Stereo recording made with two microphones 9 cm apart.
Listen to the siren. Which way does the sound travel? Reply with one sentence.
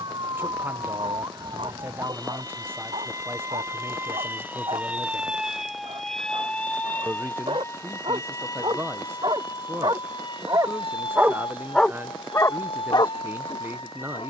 In this clip you hear the siren move from right to left.